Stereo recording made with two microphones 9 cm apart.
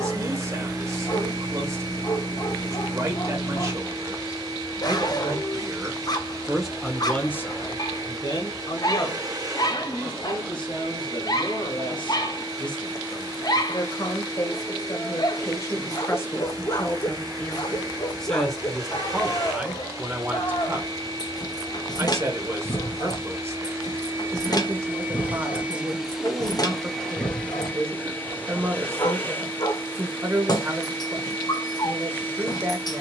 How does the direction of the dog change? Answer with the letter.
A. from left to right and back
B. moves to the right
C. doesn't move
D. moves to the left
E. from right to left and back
C.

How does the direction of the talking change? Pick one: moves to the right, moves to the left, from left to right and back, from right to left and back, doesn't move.
from right to left and back.